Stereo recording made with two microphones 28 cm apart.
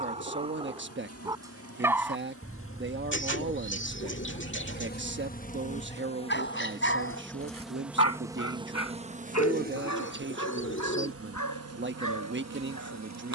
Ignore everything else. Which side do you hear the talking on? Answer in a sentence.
You can hear the talking on the right.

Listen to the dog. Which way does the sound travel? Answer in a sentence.
In this clip you hear the dog travel towards the left.